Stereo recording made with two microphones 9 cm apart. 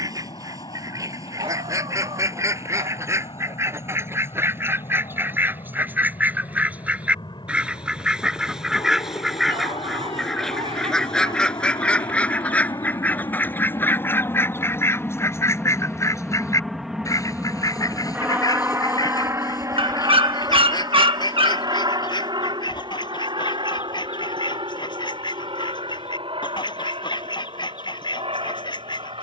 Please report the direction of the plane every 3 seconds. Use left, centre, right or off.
left, left, left, left, left, centre, right, right, right, right.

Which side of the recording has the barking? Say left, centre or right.
right.